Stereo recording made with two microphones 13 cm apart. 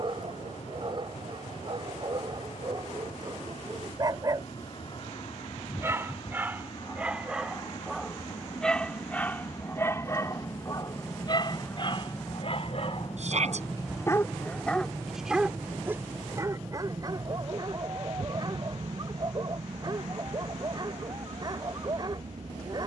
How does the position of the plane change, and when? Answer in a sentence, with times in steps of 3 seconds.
In this clip you hear the plane on the left from 0 s, in the centre from 12 s and on the right from 15 s.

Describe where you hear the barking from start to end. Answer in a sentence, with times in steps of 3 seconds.
In this clip you hear the barking on the right from 0 s, in the centre from 6 s, on the left from 9 s and on the right from 15 s.